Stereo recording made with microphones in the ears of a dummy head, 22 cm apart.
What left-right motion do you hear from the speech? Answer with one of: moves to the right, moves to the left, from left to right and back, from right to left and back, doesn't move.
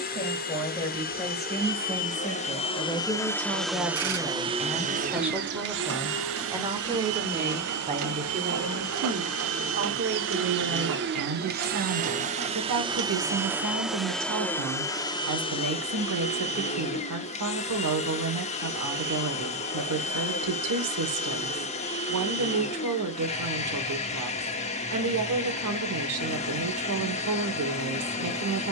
moves to the right.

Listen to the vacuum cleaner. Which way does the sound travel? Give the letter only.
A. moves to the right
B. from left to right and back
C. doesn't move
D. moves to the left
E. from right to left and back
B.